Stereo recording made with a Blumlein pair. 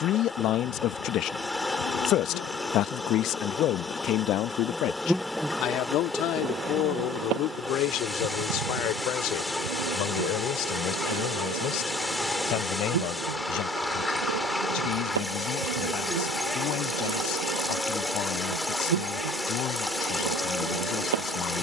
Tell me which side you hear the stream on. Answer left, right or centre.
centre.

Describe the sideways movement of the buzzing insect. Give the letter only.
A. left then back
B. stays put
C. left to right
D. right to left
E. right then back
C.